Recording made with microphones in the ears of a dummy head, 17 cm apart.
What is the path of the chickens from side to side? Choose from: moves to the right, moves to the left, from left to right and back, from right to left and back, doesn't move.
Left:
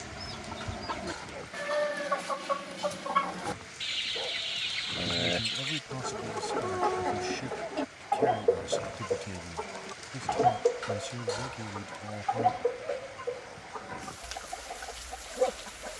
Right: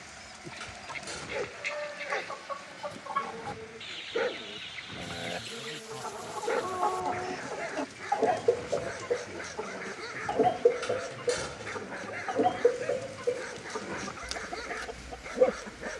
moves to the right.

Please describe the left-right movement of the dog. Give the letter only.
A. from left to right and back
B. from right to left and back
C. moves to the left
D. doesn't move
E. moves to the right
D.